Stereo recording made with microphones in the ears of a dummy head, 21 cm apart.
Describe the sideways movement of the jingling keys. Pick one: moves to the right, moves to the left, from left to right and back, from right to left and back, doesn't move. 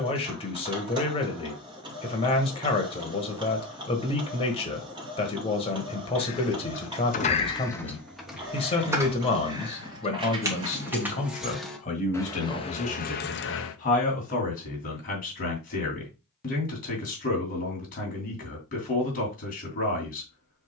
from left to right and back.